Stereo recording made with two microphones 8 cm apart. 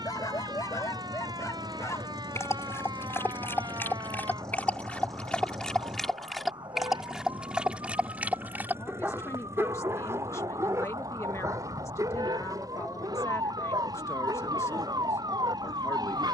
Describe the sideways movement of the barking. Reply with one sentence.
In this clip you hear the barking move to the right.